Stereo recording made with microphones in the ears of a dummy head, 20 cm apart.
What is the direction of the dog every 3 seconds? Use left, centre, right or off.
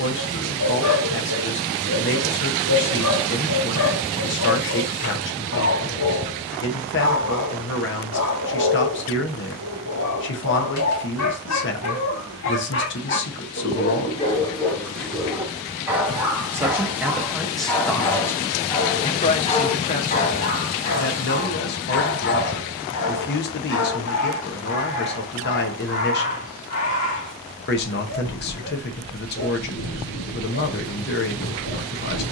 left, left, left, left, left, centre, left, left, left, left, left.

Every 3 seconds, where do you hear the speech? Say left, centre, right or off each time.
left, left, left, left, left, centre, left, left, left, left, left.